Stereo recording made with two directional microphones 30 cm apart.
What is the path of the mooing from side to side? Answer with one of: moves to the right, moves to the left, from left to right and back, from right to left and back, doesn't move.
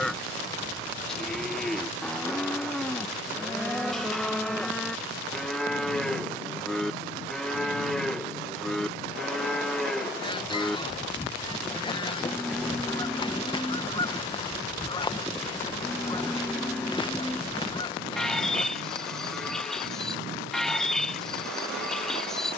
doesn't move.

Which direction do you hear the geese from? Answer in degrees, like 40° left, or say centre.
20° left.